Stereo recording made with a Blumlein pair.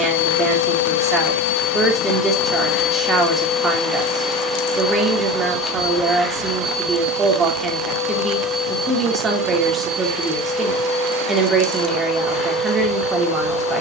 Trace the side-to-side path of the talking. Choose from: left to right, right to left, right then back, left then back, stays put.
stays put.